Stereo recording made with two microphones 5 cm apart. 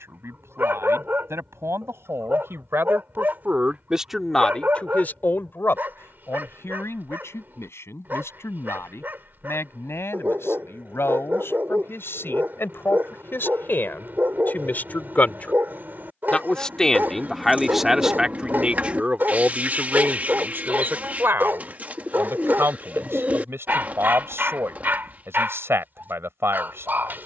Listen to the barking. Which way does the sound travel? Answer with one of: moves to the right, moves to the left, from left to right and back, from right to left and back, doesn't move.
doesn't move.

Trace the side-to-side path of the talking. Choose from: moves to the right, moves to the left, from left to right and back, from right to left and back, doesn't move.
from right to left and back.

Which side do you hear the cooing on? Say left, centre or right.
right.